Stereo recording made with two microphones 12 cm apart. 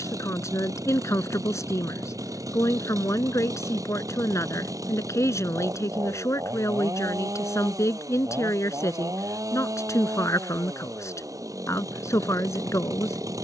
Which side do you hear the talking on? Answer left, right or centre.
left.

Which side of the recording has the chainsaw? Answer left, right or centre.
right.